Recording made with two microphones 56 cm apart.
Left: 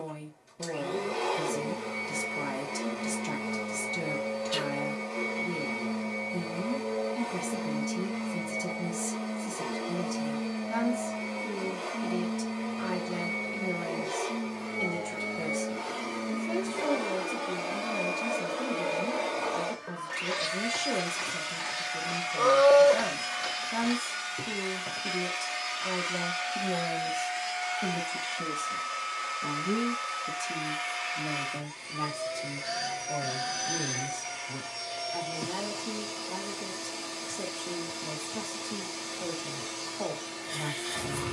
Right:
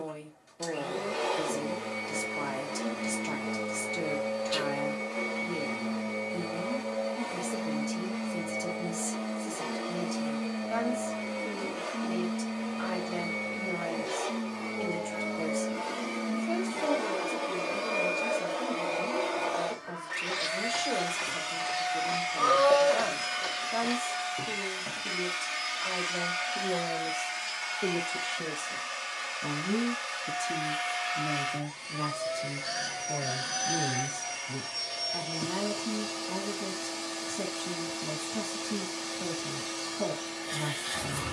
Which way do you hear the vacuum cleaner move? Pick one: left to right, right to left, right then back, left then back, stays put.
left then back.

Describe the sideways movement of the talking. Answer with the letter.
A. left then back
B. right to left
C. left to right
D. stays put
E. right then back
C.